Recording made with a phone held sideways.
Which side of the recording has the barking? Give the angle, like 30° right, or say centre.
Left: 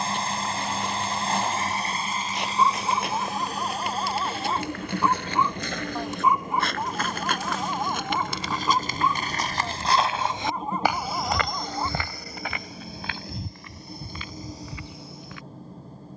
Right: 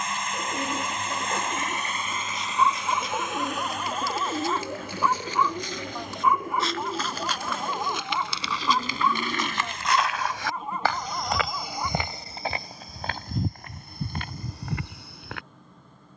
20° left.